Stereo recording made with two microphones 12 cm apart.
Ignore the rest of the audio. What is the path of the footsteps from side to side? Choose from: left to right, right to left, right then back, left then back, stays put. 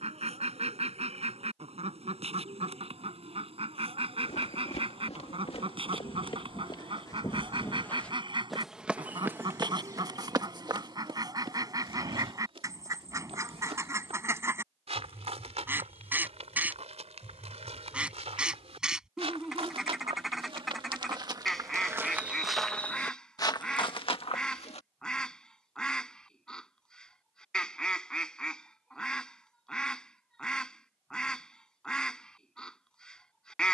right then back.